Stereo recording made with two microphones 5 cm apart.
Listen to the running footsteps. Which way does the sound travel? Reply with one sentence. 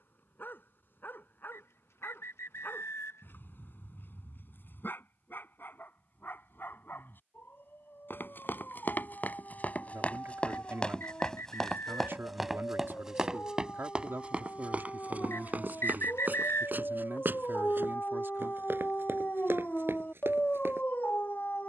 You can hear the running footsteps move to the right.